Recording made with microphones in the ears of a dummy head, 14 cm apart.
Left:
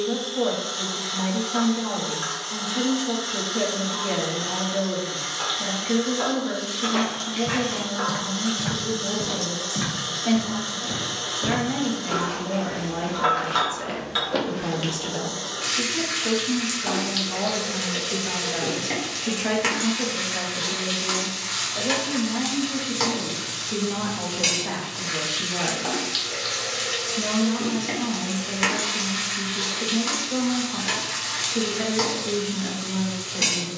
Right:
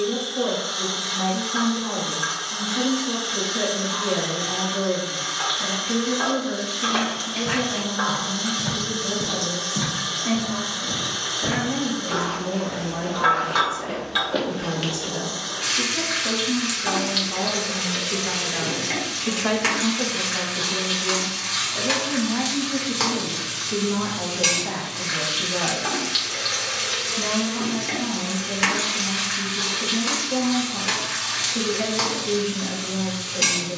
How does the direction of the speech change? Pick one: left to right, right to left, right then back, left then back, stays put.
right then back.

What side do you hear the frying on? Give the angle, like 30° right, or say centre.
centre.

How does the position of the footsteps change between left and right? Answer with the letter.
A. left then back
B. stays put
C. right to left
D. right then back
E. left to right
A.